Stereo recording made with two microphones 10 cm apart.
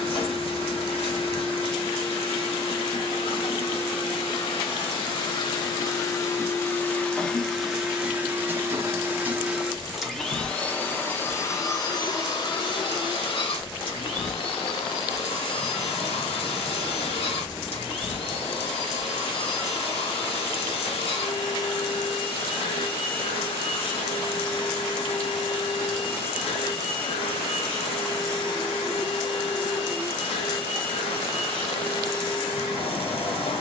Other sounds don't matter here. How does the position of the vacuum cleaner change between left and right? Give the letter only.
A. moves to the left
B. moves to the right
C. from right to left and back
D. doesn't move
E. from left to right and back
E.